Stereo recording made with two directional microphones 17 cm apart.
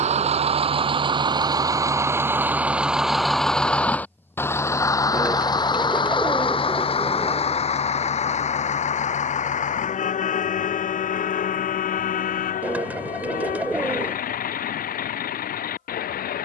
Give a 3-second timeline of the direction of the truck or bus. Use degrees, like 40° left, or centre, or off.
20° right, 10° left, 40° left, 50° left, 50° left, 60° left.